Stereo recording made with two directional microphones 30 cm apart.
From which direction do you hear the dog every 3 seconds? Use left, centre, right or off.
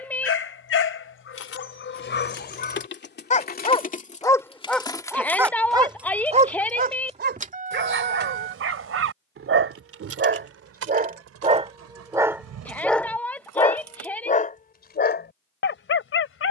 left, centre, right, right, centre, left.